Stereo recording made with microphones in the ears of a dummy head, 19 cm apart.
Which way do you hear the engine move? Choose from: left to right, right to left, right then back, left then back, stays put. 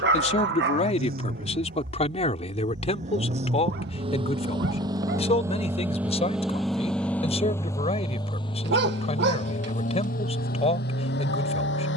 right to left.